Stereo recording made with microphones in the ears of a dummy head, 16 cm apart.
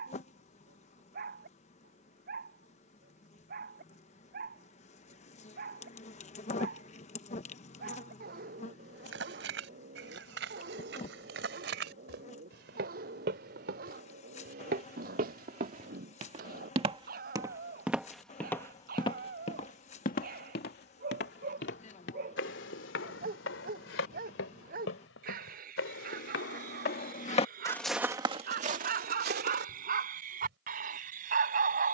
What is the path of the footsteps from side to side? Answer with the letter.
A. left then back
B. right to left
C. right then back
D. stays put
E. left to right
A.